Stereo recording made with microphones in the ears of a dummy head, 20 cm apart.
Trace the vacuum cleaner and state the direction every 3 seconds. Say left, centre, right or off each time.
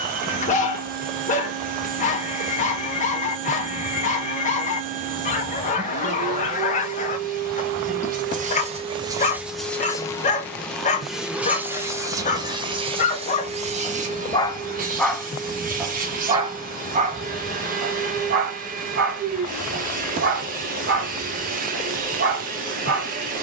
right, right, right, centre, right, right, right, right.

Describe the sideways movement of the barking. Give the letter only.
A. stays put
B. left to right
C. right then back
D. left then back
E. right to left
B.